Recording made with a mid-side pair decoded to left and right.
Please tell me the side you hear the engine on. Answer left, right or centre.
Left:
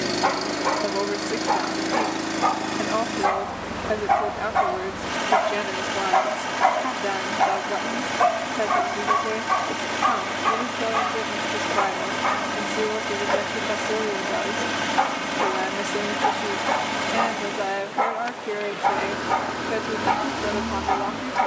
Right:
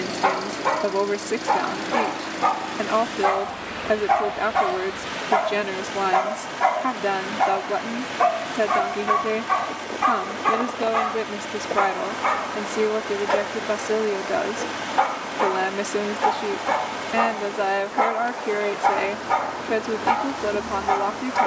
left.